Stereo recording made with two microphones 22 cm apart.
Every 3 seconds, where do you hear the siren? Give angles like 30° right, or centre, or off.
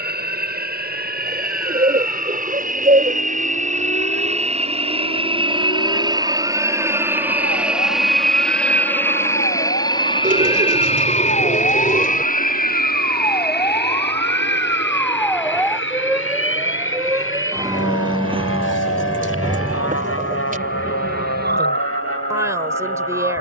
70° left, 60° left, 50° left, 40° left, 20° left, 10° right, 30° right, 50° right.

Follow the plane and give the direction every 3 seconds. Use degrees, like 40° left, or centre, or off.
50° right, 30° right, 10° right, 20° left, 50° left, 60° left, 70° left, 70° left.